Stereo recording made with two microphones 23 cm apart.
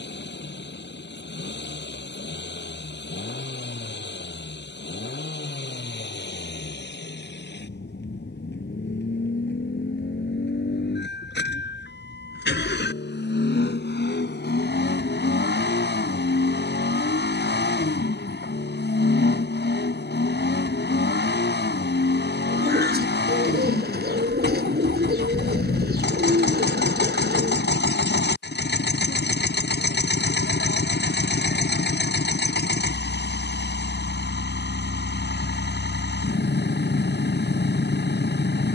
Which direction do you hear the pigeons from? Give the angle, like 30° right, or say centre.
40° right.